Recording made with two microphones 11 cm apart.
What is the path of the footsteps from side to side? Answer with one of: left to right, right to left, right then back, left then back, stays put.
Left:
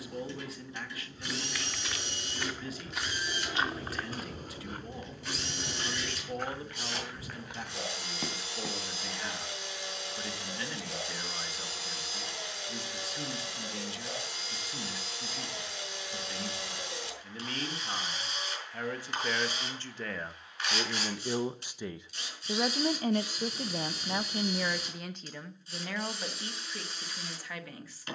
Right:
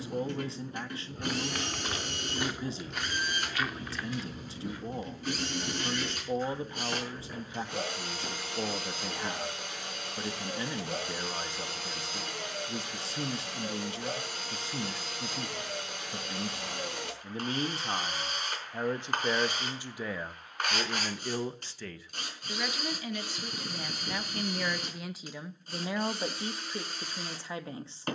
right to left.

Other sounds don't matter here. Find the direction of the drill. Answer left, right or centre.
right.